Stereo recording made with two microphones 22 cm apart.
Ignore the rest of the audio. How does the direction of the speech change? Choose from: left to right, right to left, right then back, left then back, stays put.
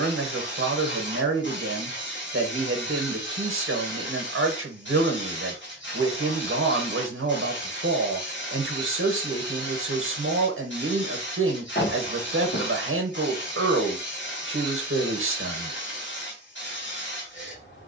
stays put.